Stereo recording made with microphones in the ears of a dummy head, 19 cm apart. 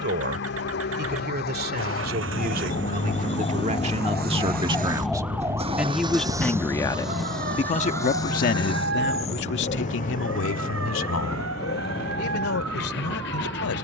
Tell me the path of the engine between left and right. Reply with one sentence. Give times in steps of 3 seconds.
In this clip you hear the engine on the right from 0 s, in the centre from 6 s and on the left from 9 s.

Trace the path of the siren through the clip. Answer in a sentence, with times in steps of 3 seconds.
You can hear the siren on the left from 0 s, in the centre from 3 s and on the right from 6 s.